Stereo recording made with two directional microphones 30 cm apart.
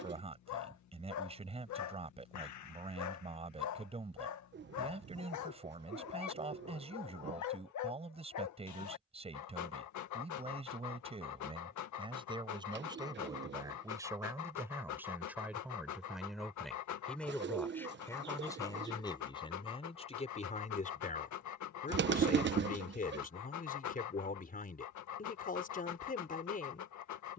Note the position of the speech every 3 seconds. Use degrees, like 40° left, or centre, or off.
20° right, 20° right, 20° right, 20° right, 10° right, centre, 20° left, 30° left, 30° left.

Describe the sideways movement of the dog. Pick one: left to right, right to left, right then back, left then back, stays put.
stays put.